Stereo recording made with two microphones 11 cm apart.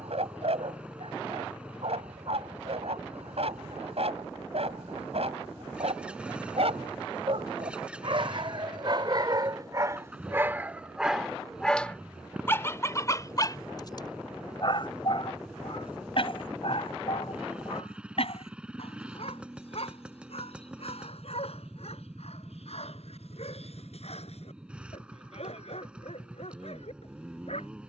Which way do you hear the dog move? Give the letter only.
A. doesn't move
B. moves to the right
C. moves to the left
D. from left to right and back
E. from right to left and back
C.